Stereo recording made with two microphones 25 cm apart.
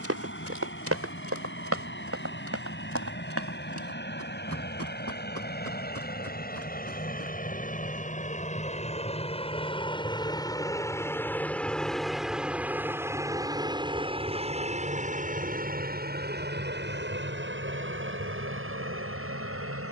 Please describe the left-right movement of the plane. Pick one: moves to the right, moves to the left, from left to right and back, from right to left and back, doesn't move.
moves to the right.